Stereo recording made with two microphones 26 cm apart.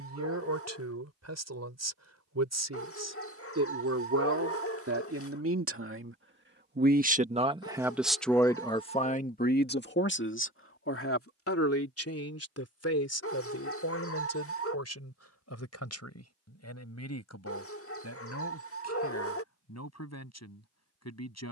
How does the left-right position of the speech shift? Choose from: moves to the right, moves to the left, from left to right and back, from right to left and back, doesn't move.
moves to the left.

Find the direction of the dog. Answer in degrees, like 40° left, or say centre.
60° left.